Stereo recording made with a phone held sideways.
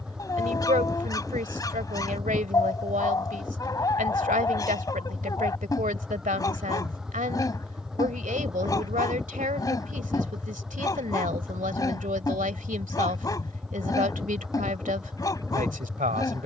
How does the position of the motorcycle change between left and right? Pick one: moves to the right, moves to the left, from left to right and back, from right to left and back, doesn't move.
doesn't move.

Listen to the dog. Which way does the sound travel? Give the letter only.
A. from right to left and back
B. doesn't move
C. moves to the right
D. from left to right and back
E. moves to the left
B.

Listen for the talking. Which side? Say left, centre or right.
right.